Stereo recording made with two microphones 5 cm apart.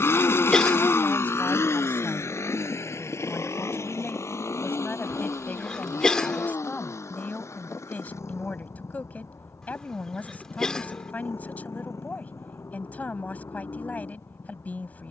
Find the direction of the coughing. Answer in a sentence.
You can hear the coughing in the centre.